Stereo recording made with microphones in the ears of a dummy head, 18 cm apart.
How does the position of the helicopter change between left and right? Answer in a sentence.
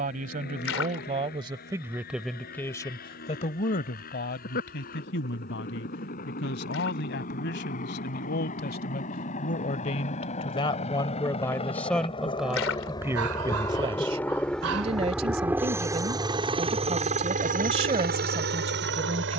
You can hear the helicopter travel towards the right.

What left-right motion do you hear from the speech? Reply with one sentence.
In this clip you hear the speech move from right to left and back again.